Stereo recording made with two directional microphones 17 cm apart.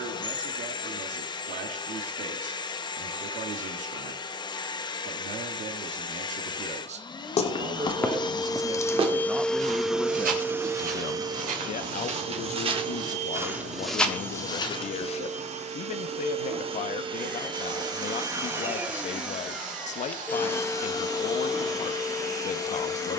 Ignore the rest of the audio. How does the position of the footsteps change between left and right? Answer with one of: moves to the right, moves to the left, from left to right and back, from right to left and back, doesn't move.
from left to right and back.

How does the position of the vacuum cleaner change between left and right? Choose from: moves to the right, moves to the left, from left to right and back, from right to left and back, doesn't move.
from left to right and back.